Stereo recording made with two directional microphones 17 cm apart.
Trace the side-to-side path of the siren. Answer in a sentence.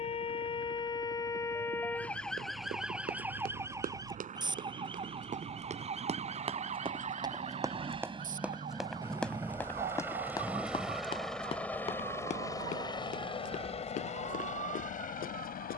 In this clip you hear the siren move from left to right.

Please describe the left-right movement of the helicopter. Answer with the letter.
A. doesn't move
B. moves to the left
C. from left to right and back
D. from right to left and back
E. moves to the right
B.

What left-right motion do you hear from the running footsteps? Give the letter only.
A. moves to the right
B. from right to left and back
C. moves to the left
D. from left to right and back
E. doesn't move
C.